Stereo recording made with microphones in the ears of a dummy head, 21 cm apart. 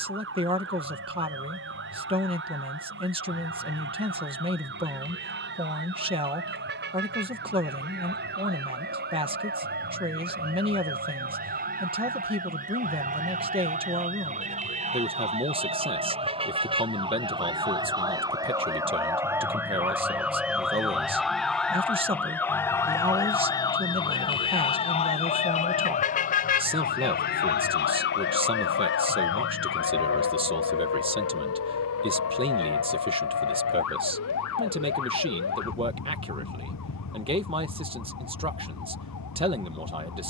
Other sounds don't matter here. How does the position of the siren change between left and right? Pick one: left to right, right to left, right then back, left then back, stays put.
right to left.